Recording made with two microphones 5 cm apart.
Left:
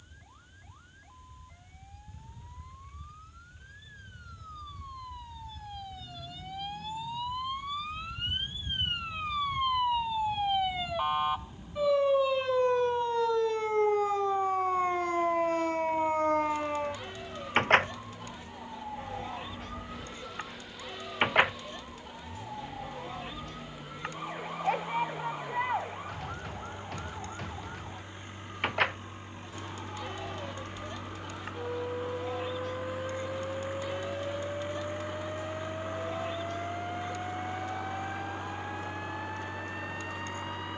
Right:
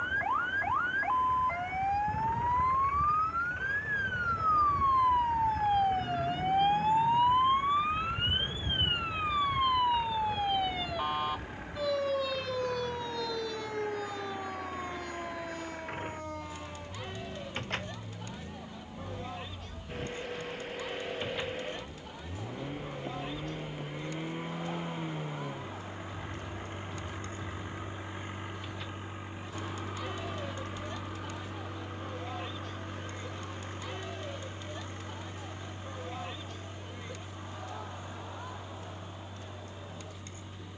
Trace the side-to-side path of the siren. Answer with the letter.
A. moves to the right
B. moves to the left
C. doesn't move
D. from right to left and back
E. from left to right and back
B.